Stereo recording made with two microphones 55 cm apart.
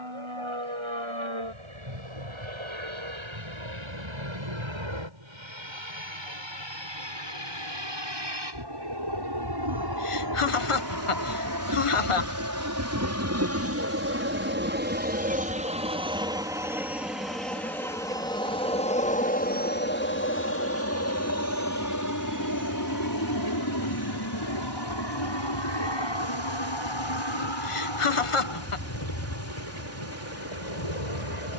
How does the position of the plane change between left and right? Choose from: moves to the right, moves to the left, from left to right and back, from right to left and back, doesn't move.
moves to the left.